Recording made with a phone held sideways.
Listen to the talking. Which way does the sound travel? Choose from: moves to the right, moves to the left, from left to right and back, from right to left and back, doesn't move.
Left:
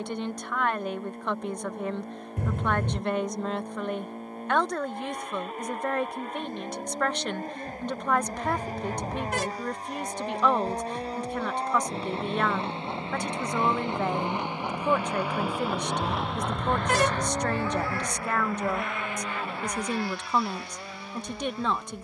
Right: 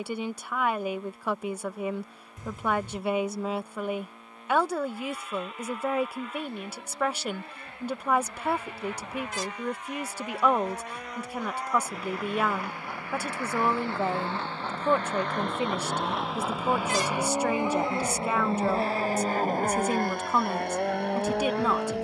doesn't move.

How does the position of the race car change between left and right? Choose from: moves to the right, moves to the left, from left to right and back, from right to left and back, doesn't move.
moves to the right.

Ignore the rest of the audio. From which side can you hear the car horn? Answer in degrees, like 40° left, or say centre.
60° left.